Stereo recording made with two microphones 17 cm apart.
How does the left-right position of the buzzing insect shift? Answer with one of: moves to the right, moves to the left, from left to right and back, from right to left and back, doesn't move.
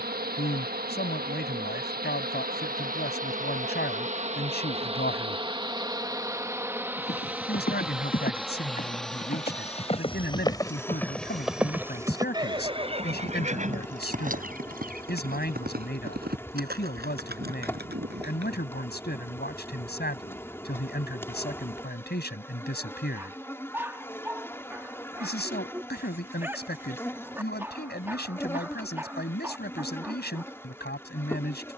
moves to the left.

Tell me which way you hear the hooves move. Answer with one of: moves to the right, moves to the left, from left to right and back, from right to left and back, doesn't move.
moves to the right.